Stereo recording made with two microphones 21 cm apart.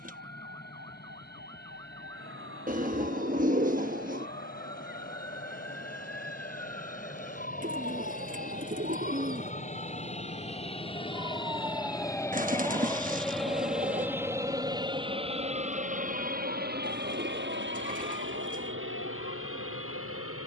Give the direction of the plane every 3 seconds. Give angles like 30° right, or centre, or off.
60° left, 50° left, 40° left, 30° left, centre, 40° right, 70° right.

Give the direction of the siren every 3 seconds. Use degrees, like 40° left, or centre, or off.
70° right, 70° right, 60° right, 30° right, 30° left, 60° left, 80° left.